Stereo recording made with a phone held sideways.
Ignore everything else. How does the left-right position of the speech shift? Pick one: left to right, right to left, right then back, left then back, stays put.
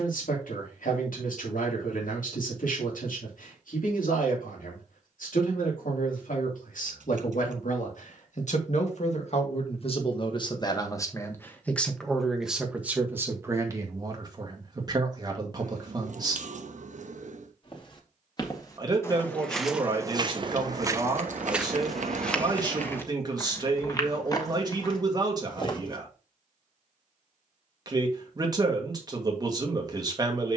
left to right.